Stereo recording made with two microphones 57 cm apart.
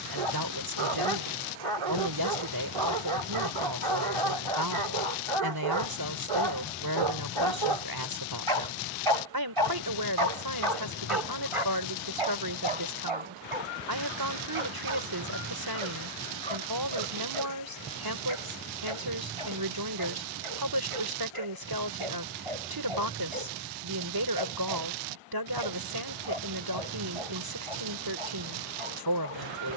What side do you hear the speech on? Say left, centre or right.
right.